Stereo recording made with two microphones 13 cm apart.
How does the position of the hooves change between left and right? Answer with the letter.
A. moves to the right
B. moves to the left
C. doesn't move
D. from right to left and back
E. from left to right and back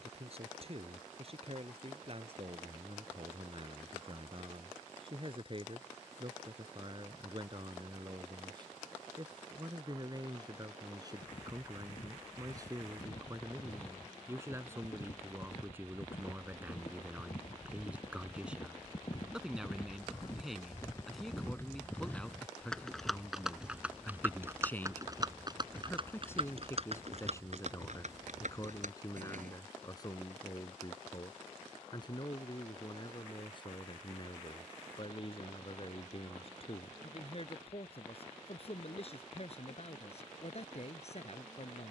A.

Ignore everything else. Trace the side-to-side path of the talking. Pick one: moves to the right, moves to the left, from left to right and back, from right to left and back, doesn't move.
moves to the left.